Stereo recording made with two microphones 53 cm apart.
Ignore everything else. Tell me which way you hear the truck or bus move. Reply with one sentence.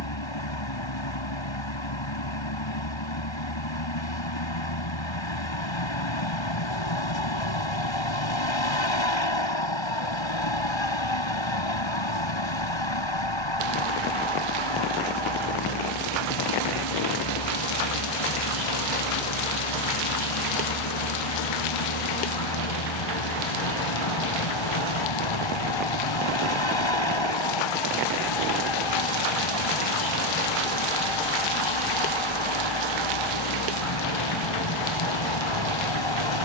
You can hear the truck or bus stay in one place.